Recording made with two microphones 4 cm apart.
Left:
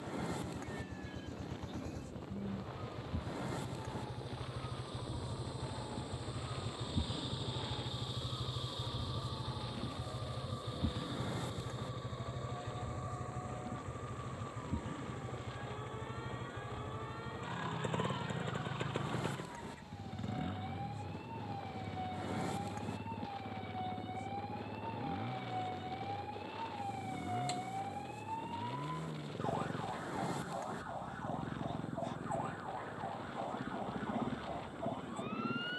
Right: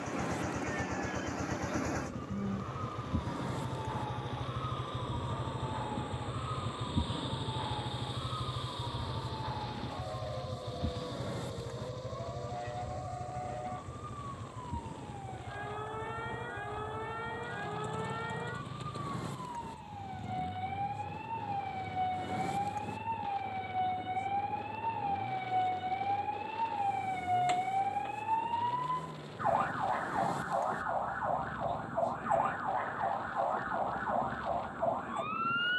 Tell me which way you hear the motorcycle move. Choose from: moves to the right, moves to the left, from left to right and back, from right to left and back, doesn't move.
moves to the left.